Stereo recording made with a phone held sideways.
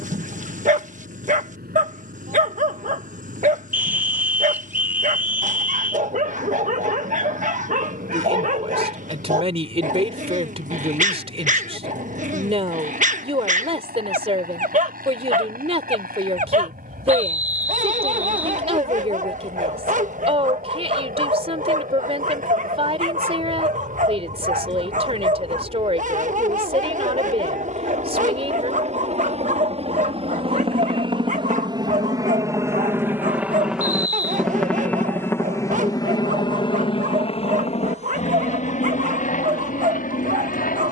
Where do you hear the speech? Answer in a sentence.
You can hear the speech on the right.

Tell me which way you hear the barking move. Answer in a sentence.
You can hear the barking stay in one place.